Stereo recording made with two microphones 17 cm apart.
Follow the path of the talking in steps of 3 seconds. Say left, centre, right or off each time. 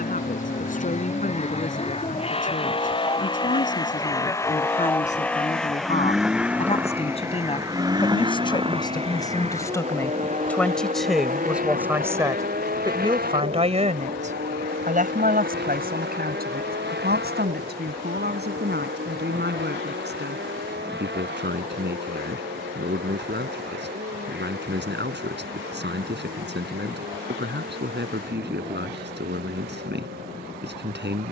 left, left, left, centre, right, right, right, right, right, right, right.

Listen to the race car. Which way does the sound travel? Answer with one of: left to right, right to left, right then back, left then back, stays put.
left to right.